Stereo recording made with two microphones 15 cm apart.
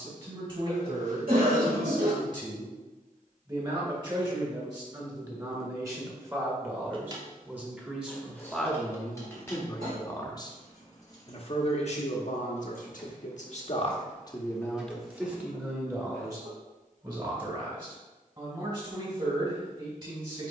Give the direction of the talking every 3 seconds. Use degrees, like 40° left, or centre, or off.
40° right, 30° right, 10° right, 30° left, 50° left, 20° right, 40° right.